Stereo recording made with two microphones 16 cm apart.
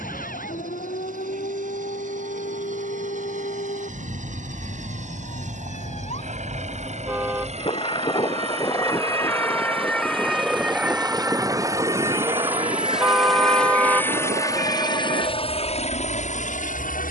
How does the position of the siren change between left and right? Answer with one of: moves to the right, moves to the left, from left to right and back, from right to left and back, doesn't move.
moves to the right.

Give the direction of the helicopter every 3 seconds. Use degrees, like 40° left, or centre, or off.
50° right, 50° right, 40° right, 30° right, centre, 40° left.